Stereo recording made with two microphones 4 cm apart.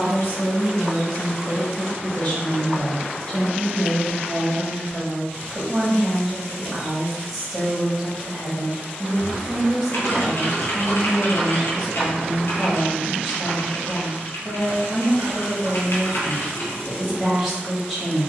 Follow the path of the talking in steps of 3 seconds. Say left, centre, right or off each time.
left, centre, centre, centre, centre, centre.